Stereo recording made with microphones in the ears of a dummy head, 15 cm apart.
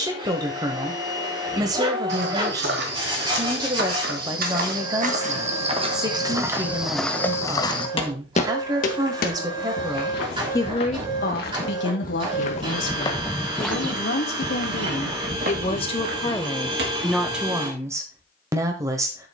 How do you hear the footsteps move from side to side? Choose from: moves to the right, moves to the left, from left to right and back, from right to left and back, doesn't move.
from right to left and back.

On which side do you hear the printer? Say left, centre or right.
right.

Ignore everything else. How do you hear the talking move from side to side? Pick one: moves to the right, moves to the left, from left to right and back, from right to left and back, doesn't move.
from right to left and back.